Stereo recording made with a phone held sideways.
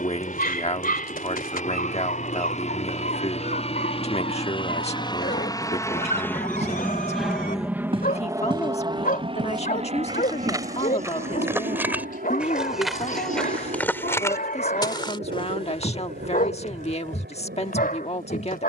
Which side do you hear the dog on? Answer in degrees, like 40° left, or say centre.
60° left.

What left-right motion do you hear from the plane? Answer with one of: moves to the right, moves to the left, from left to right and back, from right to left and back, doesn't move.
moves to the right.